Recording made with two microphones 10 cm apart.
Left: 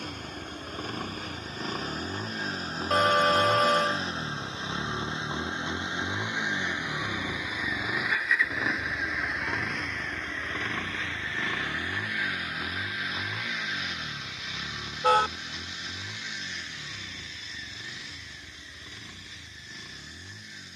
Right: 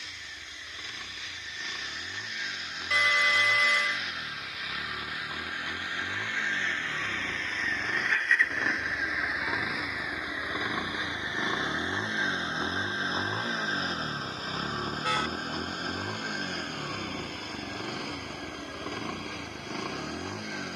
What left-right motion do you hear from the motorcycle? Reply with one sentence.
In this clip you hear the motorcycle move from left to right.